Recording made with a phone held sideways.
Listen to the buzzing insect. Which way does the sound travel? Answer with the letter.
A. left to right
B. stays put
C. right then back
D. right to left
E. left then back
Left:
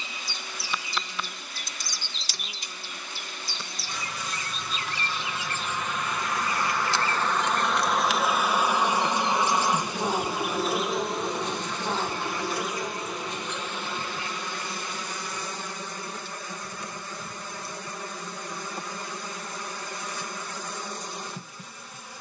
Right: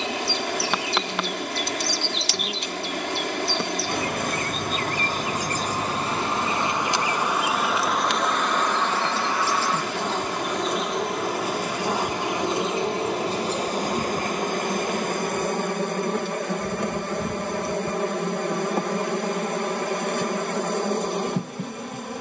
E.